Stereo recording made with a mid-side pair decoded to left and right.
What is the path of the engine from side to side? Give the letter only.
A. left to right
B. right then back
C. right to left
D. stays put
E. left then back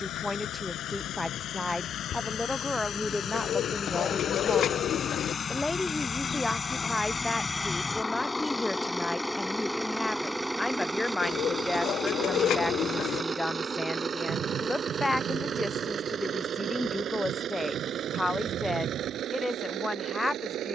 A.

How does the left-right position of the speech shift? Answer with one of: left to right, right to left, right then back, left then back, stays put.
stays put.